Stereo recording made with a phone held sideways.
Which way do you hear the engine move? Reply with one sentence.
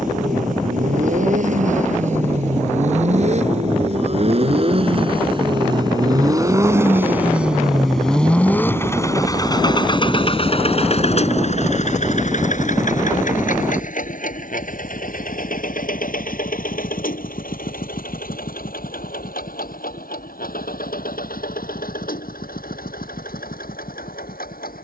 In this clip you hear the engine travel towards the left.